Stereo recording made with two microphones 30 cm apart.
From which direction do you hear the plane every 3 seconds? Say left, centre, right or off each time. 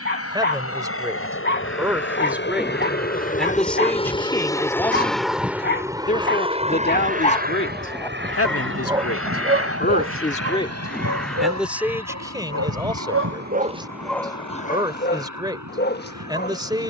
left, centre, right, right, right, right.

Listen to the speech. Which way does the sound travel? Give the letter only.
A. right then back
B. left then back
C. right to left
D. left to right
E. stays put
B.